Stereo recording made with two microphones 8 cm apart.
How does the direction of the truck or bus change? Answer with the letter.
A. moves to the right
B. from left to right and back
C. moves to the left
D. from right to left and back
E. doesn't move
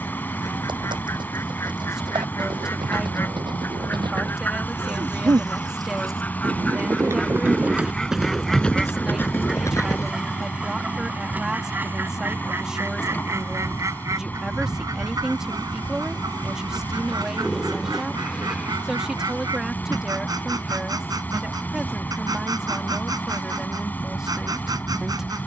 E.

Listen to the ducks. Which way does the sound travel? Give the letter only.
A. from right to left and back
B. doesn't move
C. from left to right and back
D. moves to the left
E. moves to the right
E.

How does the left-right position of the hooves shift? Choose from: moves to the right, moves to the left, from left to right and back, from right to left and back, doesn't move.
moves to the left.